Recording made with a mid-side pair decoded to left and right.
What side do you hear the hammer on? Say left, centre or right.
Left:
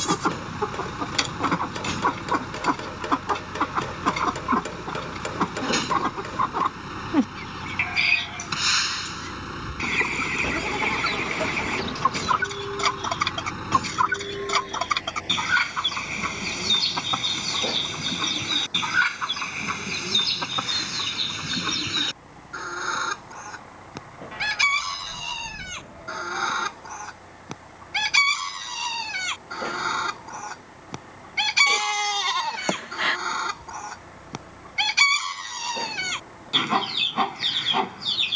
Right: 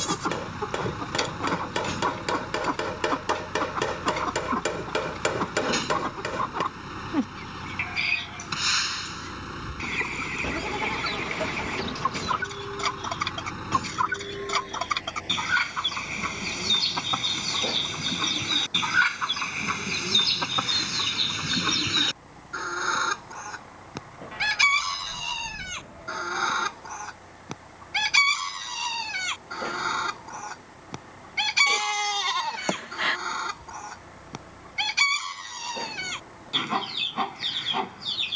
right.